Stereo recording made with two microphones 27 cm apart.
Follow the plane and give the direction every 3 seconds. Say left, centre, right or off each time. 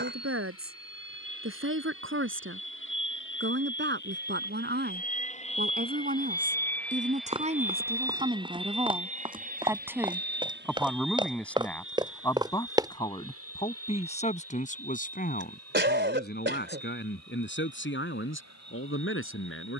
left, left, centre, right, right, right, right.